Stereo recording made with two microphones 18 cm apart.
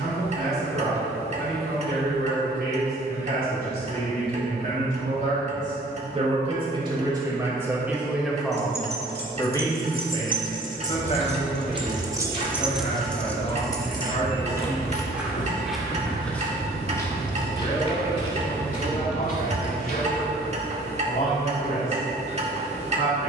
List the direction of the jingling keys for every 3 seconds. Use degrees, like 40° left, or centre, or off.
off, off, 60° right, 40° right, 10° left, 40° left, 50° right, off.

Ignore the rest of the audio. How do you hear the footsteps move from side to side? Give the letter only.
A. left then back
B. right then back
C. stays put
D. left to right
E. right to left
E.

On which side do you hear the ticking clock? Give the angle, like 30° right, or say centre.
40° right.